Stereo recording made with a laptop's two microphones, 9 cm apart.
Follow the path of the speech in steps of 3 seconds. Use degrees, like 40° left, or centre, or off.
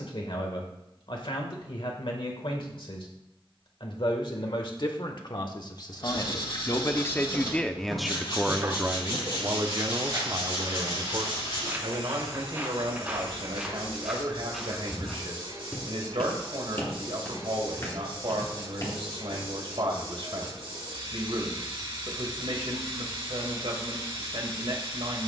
70° left, 60° left, 10° left, 50° right, 70° right, 70° right, 70° right, 70° right, 70° right.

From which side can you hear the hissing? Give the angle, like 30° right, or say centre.
70° right.